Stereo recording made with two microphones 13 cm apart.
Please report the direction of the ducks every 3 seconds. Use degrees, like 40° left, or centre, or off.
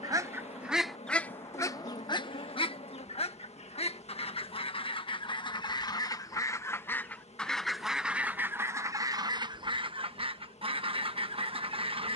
20° left, 40° left, centre, 40° right.